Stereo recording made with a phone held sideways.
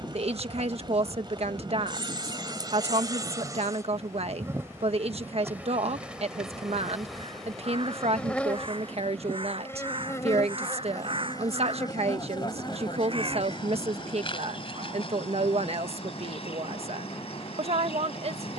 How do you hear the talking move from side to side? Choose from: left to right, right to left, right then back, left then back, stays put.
stays put.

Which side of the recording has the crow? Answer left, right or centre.
right.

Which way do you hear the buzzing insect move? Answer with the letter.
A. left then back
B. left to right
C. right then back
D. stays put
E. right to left
E.